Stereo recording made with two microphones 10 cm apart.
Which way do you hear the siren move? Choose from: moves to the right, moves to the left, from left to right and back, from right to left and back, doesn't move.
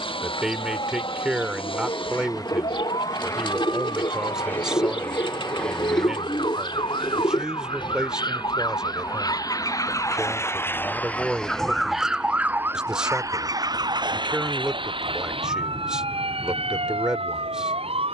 moves to the right.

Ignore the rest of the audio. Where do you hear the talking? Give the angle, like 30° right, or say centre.
10° right.